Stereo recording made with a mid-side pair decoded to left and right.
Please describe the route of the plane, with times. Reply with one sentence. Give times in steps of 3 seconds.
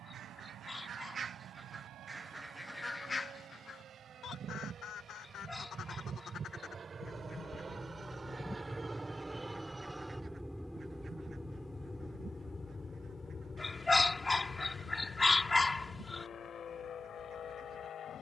In this clip you hear the plane on the right from 0 s, in the centre from 9 s and on the left from 12 s.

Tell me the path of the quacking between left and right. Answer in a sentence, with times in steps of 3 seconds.
In this clip you hear the quacking on the right from 0 s, on the left from 3 s and on the right from 9 s.